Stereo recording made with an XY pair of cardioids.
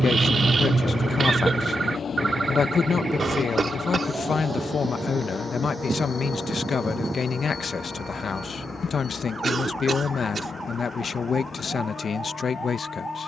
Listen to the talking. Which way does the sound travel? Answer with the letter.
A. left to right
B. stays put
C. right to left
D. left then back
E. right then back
B.